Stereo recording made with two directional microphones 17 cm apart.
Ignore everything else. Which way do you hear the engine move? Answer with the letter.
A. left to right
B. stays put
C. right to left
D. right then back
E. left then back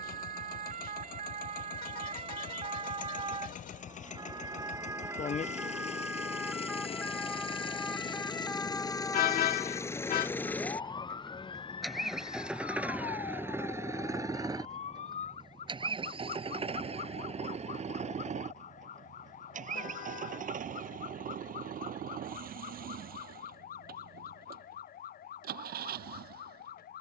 A.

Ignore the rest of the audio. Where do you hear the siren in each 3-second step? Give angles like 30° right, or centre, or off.
40° right, 20° right, centre, 20° left, 40° left, 40° left, 50° left, 50° left, 60° left.